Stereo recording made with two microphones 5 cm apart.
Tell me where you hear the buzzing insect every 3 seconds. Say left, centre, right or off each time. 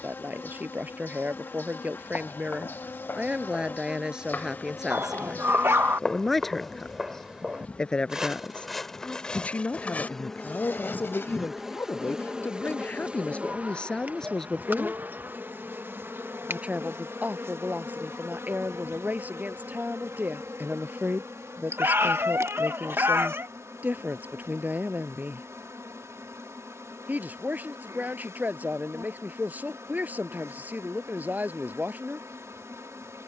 left, left, left, centre, right, right, right, right, right, right, right.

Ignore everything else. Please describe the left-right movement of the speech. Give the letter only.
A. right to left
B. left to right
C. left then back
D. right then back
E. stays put
C.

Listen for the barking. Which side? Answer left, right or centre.
right.